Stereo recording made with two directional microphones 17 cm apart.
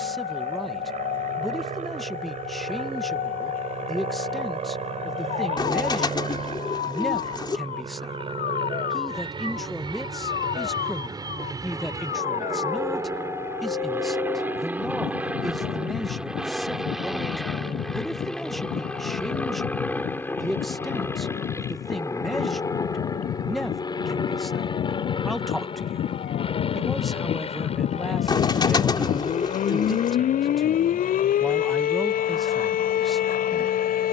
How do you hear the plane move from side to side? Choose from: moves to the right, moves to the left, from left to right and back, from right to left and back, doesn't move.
moves to the left.